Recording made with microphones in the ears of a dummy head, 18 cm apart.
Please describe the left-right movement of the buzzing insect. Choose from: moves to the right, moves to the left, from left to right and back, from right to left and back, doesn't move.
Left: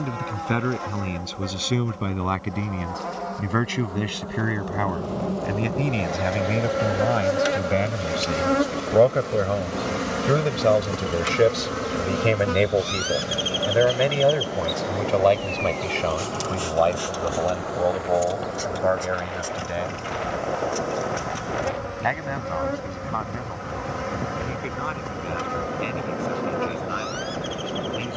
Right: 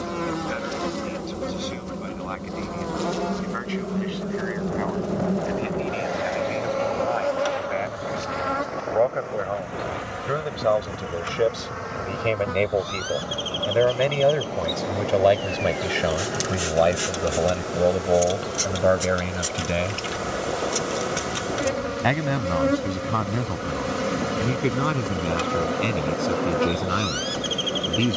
from right to left and back.